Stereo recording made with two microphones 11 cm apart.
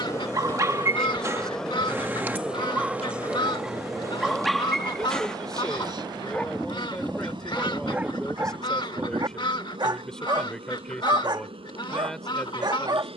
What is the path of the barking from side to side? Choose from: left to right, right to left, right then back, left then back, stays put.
left then back.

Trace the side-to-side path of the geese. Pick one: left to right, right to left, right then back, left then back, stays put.
stays put.